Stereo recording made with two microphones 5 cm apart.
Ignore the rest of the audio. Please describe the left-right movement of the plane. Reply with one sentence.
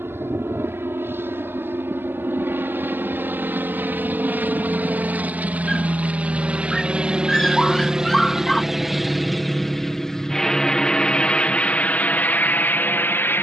In this clip you hear the plane travel towards the left.